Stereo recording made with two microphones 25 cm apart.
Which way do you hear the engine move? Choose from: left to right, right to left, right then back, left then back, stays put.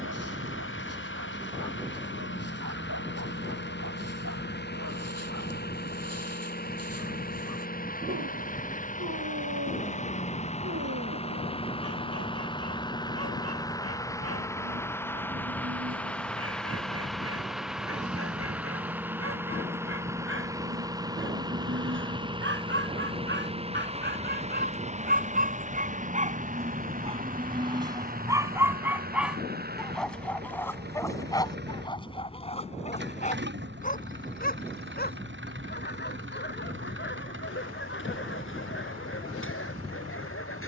left to right.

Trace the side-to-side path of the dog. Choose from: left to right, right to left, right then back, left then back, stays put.
right to left.